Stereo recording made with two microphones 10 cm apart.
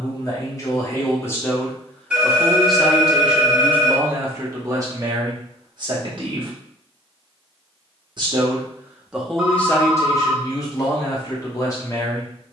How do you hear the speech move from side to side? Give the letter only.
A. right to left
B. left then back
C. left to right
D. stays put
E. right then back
E.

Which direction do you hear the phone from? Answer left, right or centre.
centre.